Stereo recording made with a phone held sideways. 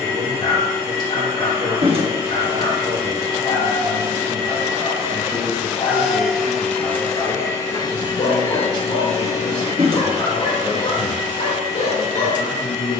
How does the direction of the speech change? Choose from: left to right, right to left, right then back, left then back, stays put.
right to left.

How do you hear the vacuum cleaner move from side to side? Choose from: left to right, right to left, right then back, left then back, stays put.
right to left.